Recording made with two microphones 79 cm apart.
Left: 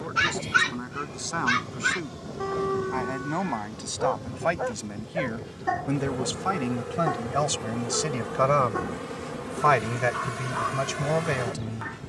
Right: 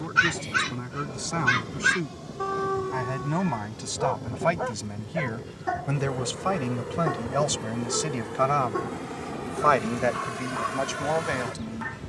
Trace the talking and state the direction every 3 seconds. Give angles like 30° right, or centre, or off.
50° right, 40° right, centre, 50° left.